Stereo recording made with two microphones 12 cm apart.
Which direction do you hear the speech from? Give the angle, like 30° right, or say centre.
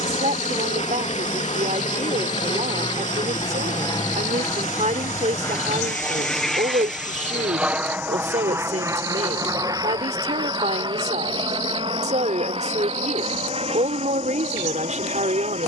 80° right.